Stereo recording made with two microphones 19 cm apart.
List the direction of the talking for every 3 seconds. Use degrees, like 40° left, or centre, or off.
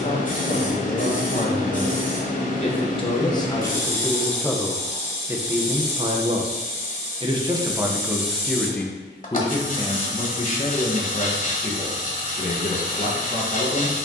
40° left, centre, 10° right, 40° left, 40° left.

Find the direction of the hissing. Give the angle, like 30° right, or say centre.
40° left.